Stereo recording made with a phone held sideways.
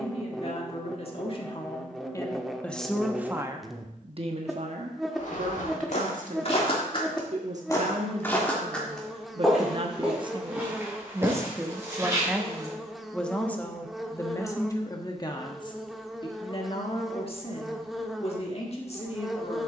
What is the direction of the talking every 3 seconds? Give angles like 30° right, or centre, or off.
30° left, 50° right, 60° right, 30° right, 10° left, 40° left, 50° left.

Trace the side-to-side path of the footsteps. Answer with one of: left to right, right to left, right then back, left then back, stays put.
left to right.